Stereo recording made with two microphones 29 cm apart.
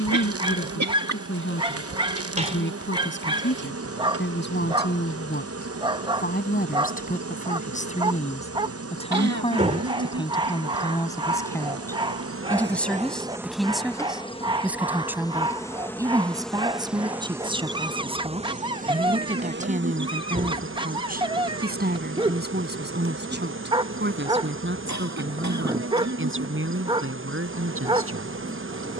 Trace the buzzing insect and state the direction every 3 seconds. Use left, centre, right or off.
right, right, right, right, centre, centre, right, right, right, right.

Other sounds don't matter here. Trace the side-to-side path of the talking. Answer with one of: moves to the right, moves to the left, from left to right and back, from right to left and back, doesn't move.
moves to the right.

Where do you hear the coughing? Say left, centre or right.
right.